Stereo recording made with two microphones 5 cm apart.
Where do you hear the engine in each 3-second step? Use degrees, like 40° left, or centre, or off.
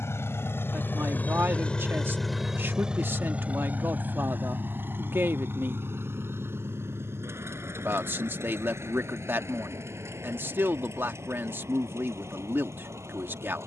30° left, 40° right, 60° right, 60° right, 70° right.